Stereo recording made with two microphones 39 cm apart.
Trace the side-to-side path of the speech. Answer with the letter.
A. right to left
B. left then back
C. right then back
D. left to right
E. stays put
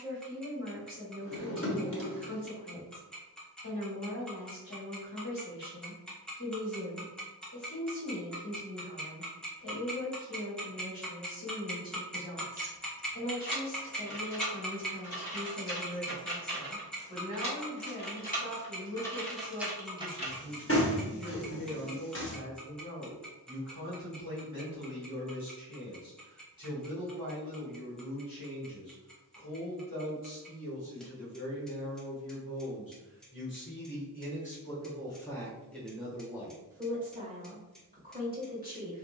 D.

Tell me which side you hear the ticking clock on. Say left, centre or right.
centre.